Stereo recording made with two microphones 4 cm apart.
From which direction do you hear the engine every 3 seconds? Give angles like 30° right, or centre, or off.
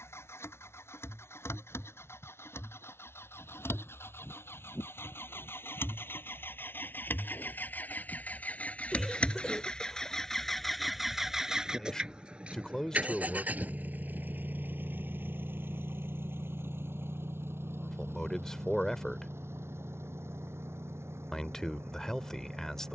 70° left, 60° left, 50° left, 10° left, 30° right, 50° right, 60° right, 70° right.